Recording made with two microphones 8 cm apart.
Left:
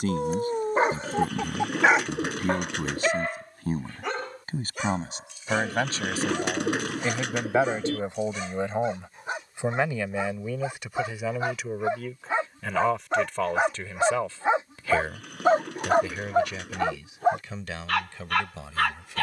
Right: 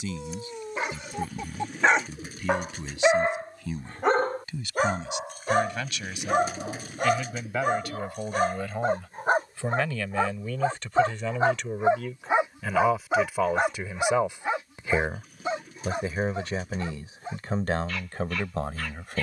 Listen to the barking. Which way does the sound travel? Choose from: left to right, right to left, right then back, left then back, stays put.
right then back.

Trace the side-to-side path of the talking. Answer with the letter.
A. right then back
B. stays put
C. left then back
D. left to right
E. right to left
D.